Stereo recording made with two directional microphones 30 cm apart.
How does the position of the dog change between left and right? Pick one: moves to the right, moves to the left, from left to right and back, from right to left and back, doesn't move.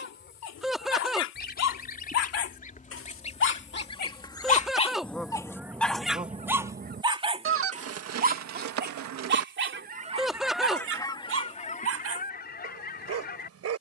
moves to the right.